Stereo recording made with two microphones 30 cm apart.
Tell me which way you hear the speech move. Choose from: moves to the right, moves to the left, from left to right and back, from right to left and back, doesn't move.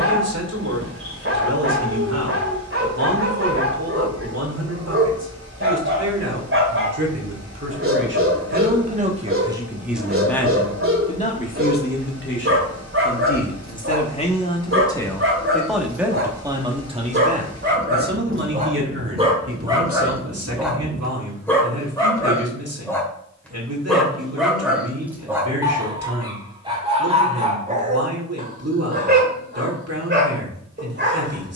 from right to left and back.